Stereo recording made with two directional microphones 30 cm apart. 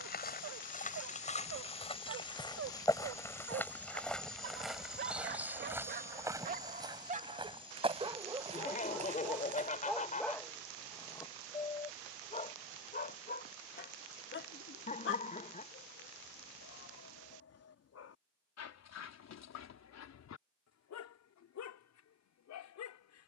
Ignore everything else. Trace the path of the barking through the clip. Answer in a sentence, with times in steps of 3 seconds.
In this clip you hear the barking on the right from 0 s, in the centre from 9 s and on the left from 12 s.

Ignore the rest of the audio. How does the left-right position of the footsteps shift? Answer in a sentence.
You can hear the footsteps go from the left side to the right.